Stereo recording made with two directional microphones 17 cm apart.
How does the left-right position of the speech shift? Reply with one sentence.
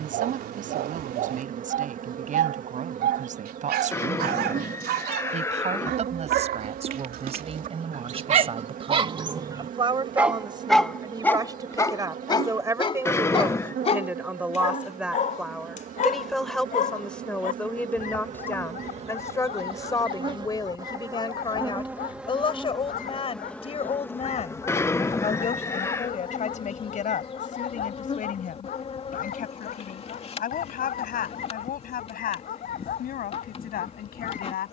In this clip you hear the speech travel towards the left.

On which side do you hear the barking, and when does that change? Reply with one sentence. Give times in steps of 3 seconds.
You can hear the barking on the right from 0 s, in the centre from 9 s and on the left from 12 s.